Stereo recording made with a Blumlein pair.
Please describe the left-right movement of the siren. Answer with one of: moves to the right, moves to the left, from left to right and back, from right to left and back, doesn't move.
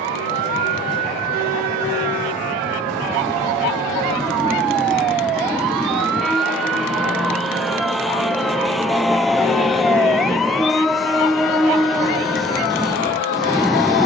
moves to the left.